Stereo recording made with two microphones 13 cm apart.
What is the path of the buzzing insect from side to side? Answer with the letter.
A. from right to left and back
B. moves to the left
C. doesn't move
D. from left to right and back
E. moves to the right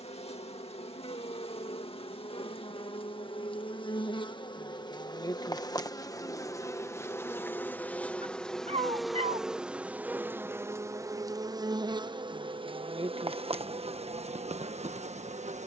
E.